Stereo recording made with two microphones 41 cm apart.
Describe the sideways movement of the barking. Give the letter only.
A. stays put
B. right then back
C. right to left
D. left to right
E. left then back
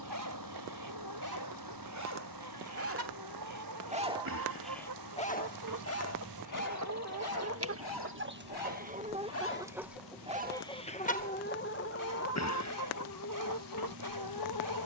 E.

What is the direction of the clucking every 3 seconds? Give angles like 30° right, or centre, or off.
60° right, 50° right, 30° right, 10° left, 50° left.